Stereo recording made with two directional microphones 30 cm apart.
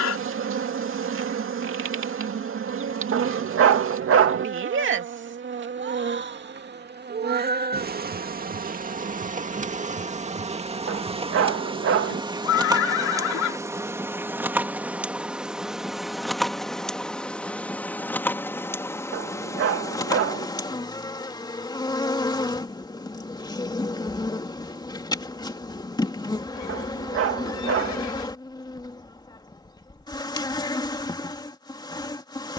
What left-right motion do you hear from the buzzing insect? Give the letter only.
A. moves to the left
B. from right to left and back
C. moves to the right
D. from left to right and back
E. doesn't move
A.